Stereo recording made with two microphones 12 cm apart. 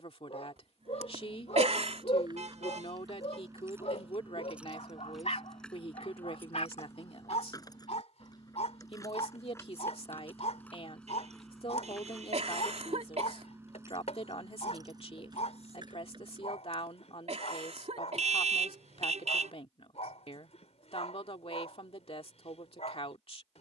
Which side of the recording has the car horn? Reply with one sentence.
You can hear the car horn on the right.